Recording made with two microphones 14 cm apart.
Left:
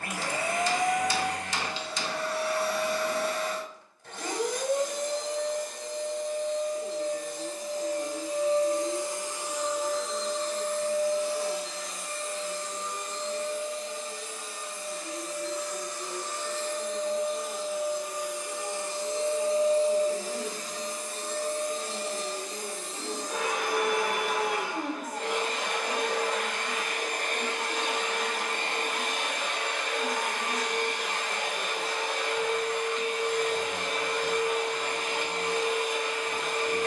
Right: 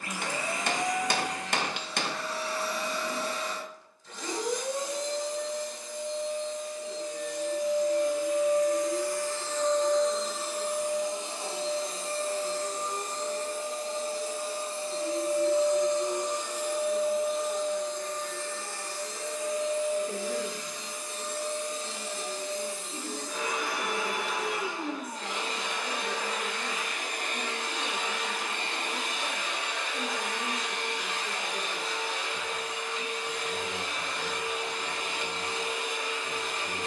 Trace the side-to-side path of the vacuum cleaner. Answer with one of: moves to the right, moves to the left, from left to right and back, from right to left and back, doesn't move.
from left to right and back.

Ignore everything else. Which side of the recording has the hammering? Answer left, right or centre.
right.